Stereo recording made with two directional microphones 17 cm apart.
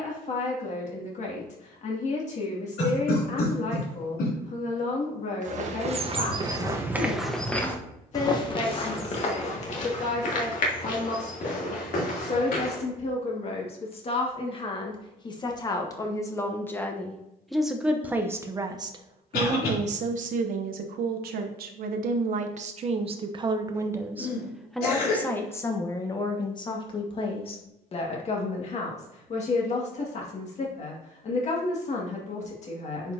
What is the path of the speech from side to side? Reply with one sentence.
In this clip you hear the speech move from left to right and back again.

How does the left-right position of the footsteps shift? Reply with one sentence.
You can hear the footsteps move to the left.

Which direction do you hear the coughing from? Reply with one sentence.
You can hear the coughing on the left.